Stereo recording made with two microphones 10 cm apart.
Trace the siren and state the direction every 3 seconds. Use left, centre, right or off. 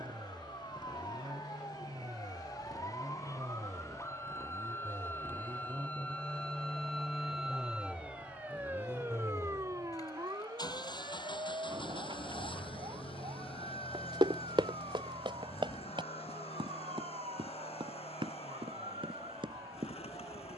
left, left, centre, right, right, right, right.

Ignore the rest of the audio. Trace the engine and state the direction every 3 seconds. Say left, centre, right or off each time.
right, right, centre, left, left, left, left.